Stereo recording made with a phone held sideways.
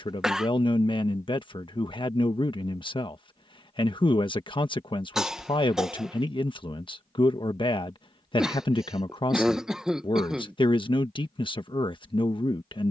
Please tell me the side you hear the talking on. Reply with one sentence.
You can hear the talking on the left.